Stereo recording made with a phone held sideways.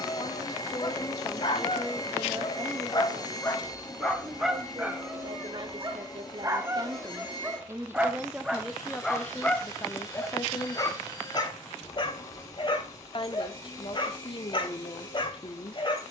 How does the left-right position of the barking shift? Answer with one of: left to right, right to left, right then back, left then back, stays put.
right then back.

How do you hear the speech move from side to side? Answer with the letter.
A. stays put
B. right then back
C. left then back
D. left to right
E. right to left
B.